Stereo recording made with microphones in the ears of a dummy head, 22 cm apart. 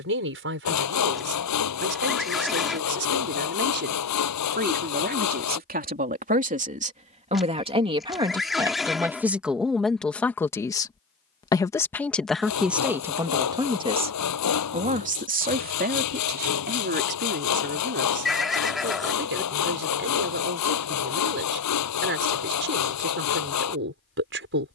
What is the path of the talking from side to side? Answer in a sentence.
In this clip you hear the talking move from right to left and back again.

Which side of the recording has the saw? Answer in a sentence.
In this clip you hear the saw on the left.